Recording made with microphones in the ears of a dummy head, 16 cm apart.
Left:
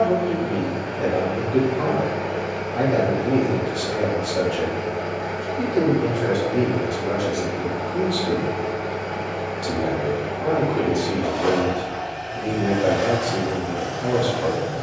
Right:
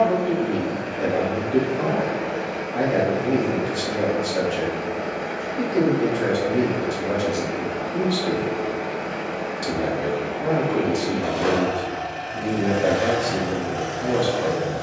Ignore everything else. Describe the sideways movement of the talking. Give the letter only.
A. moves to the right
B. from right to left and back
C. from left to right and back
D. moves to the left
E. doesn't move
E.